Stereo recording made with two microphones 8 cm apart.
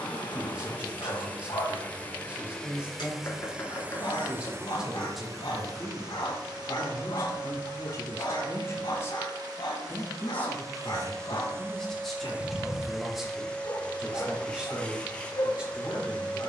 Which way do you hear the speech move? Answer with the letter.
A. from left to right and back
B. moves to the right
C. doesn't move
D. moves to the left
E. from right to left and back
E.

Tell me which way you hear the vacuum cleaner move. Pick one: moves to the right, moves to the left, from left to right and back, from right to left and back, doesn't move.
from left to right and back.